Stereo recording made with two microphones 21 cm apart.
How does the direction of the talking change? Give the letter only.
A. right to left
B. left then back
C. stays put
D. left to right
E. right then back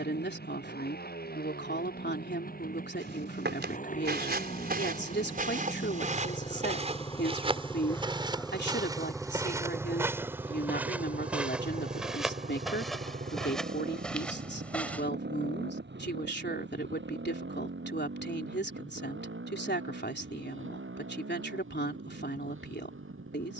C.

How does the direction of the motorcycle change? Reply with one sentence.
In this clip you hear the motorcycle travel towards the right.